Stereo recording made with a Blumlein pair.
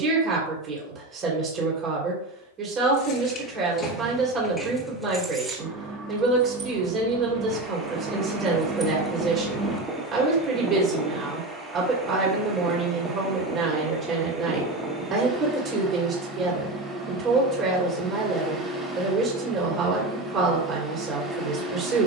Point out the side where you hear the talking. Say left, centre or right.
right.